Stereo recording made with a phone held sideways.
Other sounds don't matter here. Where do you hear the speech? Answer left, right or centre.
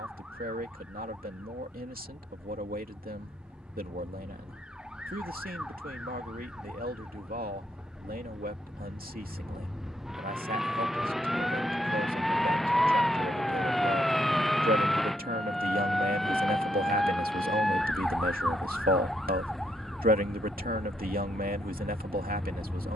right.